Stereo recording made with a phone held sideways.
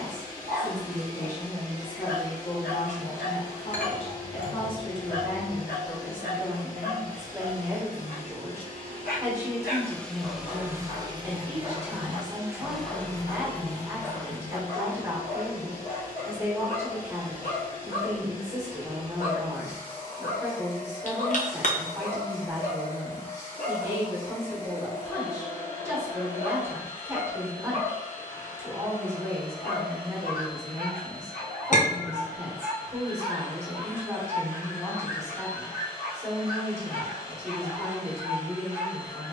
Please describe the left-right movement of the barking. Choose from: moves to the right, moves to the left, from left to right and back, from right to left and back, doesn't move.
doesn't move.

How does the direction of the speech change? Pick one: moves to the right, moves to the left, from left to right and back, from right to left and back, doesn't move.
moves to the right.